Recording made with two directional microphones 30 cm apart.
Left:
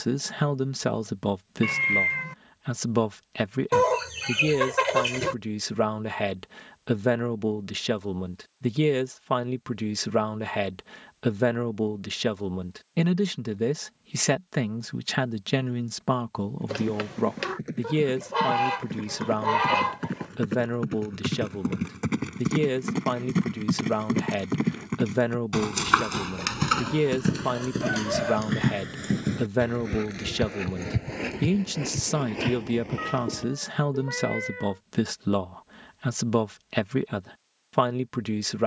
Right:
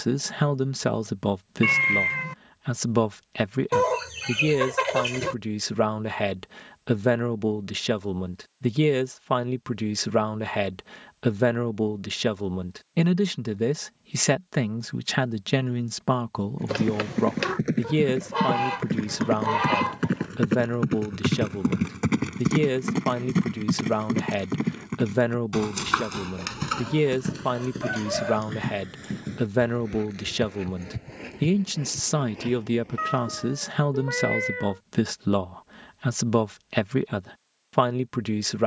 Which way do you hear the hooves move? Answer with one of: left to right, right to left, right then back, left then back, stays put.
right to left.